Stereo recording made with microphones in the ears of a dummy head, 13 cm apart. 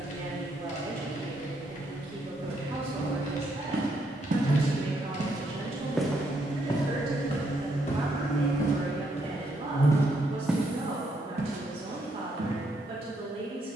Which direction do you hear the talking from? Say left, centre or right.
right.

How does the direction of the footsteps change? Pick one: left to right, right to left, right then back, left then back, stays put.
left then back.